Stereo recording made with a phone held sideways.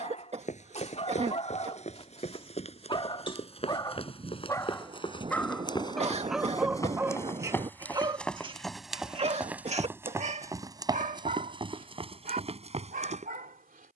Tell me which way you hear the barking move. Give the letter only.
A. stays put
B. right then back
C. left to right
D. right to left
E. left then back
C.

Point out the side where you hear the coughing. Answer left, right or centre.
right.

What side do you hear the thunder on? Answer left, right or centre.
right.